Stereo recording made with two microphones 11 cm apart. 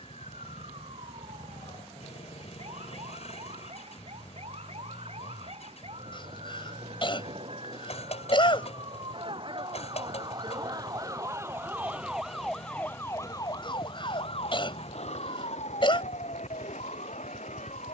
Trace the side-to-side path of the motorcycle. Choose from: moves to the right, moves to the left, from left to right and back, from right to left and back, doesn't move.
doesn't move.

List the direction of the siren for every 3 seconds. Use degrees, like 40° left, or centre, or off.
70° right, 60° right, 60° right, 40° right, 30° left, 80° left.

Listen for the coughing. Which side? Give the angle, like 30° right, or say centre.
50° left.